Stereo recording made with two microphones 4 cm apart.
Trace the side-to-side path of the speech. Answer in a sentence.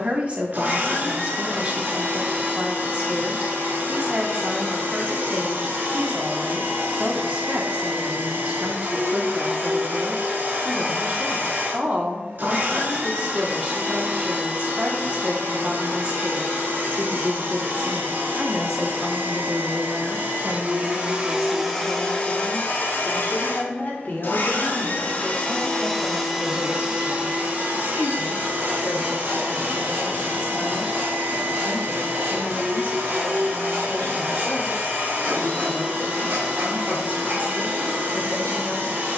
You can hear the speech go from the right side to the left.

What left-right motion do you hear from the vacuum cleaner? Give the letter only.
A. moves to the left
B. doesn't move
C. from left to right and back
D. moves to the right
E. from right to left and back
E.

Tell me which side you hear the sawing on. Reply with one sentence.
In this clip you hear the sawing on the right.